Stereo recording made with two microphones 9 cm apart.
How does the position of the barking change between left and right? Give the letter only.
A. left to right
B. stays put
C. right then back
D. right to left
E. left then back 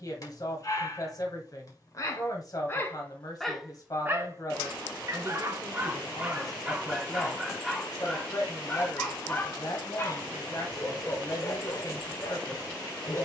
C.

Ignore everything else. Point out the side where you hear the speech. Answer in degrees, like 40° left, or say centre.
40° left.